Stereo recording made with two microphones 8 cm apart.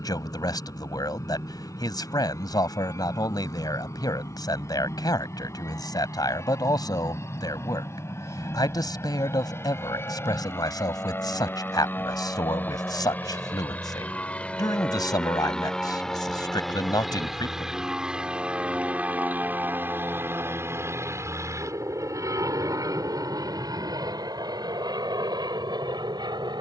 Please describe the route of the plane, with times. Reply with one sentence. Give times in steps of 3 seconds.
You can hear the plane on the left from 0 s, in the centre from 15 s and on the right from 18 s.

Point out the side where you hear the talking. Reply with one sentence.
You can hear the talking on the left.